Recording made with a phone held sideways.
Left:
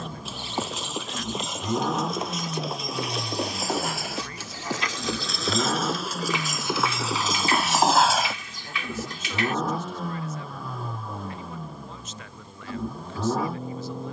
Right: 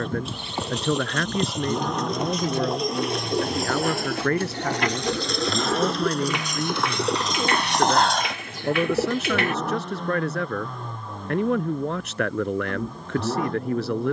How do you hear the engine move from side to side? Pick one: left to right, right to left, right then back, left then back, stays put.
stays put.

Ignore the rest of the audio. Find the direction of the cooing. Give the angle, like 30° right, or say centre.
50° right.